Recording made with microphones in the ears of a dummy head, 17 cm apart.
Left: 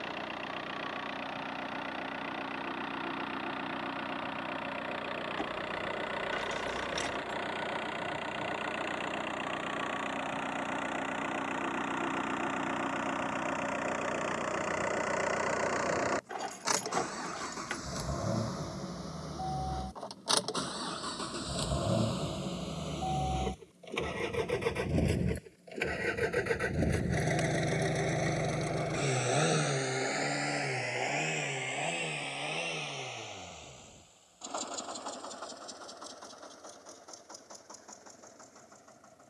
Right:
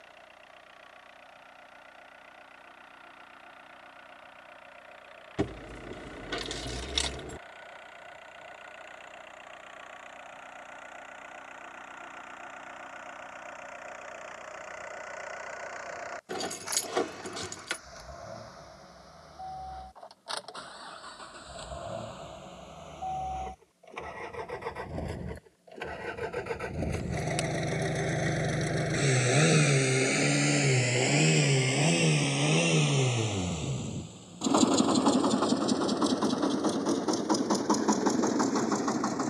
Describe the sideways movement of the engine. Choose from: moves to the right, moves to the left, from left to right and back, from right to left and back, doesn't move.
moves to the right.